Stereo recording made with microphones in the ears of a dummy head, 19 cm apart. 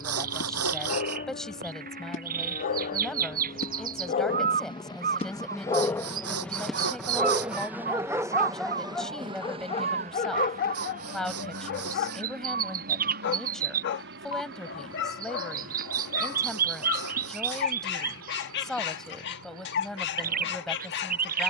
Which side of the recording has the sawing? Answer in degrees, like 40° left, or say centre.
80° right.